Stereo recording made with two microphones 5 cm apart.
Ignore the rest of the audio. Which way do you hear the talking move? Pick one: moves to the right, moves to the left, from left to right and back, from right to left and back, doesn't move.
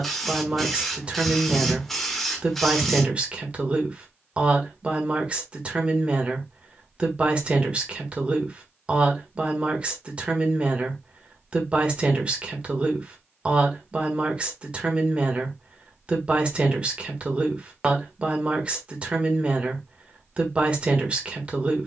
doesn't move.